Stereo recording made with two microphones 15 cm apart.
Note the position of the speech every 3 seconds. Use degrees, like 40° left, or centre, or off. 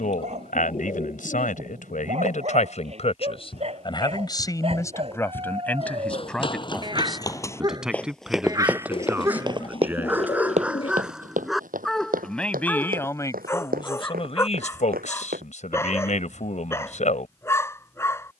60° left, 20° left, centre, 10° right, 30° left, 60° left.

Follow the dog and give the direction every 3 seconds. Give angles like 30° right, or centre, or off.
50° right, 40° right, 30° right, 10° right, 10° left, 20° left.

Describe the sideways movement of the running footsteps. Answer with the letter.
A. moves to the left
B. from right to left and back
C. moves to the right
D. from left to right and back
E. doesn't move
C.